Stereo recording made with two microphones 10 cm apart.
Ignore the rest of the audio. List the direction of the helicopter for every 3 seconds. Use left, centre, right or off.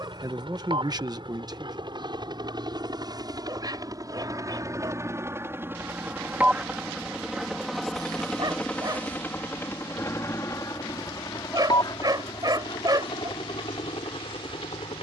right, right, centre, left, left.